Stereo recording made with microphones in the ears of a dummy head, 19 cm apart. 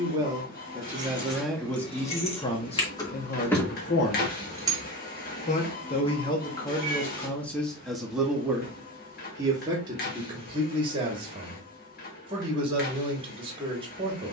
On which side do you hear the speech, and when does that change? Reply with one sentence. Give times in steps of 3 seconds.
In this clip you hear the speech in the centre from 0 s, on the left from 3 s, in the centre from 6 s and on the right from 9 s.